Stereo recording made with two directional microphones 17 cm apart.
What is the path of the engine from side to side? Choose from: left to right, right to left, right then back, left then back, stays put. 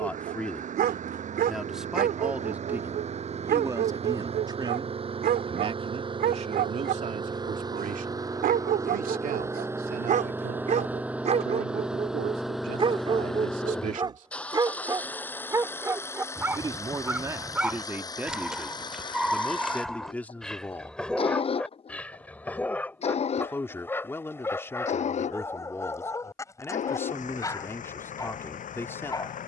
right to left.